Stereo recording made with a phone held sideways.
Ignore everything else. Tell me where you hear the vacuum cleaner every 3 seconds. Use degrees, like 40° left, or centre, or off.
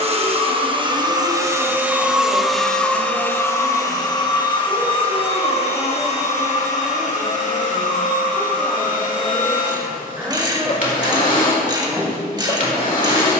20° right, 30° left, 50° left, 50° left, 50° left.